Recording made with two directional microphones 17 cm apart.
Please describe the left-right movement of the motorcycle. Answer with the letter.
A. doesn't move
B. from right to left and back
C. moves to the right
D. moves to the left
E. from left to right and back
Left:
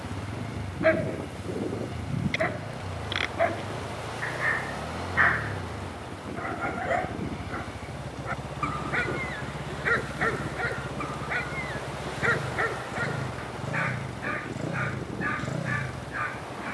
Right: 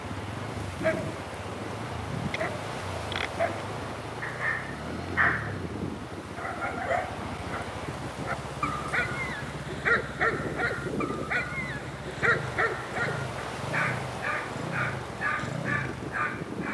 A.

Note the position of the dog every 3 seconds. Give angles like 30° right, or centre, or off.
30° left, 20° left, centre, 10° right, 10° right, 10° right.